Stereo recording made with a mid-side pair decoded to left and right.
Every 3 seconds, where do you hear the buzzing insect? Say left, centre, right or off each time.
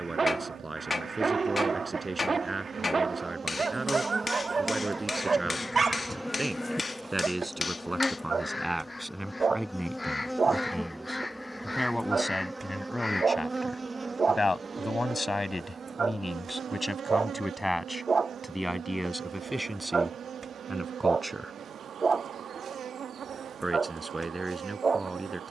right, right, centre, centre, right, right, right, right, right.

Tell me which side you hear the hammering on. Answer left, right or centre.
left.